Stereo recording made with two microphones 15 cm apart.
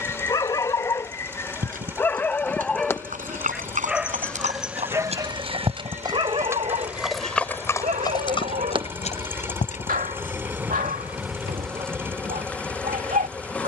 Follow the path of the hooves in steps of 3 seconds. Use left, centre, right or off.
right, right, centre, left, off.